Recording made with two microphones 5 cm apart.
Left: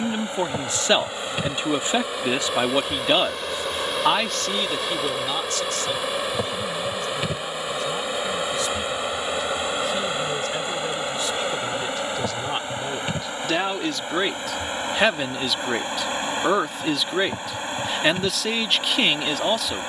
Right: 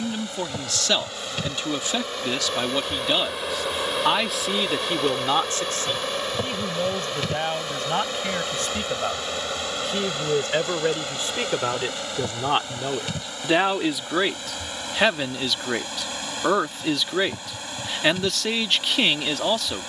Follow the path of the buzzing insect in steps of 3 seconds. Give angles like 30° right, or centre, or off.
10° left, centre, 10° left, 20° left, 20° left, 30° left, 30° left.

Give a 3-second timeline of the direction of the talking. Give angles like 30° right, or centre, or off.
20° left, 20° right, 50° right, 40° right, 20° right, centre, centre.